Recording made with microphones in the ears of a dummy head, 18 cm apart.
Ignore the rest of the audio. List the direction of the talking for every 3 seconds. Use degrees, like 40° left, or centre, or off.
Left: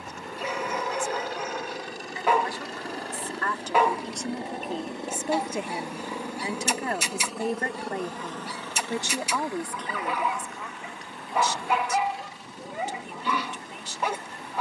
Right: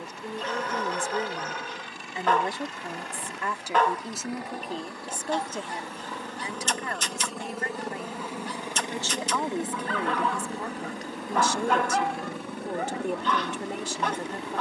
30° right, centre, 30° left, 20° right, 40° right.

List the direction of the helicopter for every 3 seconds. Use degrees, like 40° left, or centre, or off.
40° left, 20° left, centre, 30° right, 50° right.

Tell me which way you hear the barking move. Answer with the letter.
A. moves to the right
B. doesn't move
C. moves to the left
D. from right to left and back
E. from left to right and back
B.